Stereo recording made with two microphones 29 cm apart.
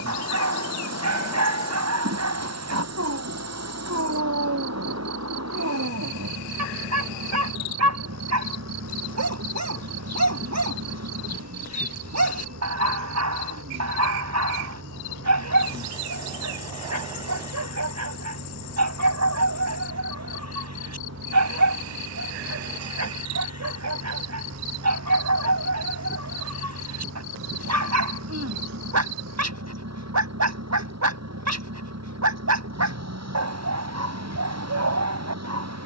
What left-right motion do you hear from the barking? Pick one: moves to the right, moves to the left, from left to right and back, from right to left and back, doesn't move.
doesn't move.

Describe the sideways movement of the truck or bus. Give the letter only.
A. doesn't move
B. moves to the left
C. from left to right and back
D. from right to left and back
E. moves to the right
A.